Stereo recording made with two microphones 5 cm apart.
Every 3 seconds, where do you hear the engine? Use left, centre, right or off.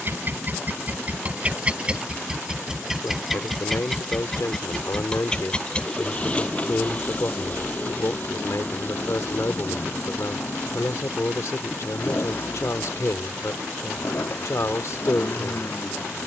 right, centre, left, left, left, left.